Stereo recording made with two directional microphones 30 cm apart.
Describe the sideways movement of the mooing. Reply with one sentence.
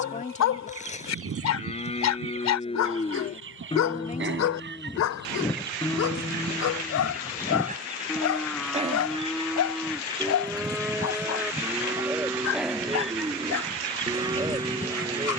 You can hear the mooing move to the right.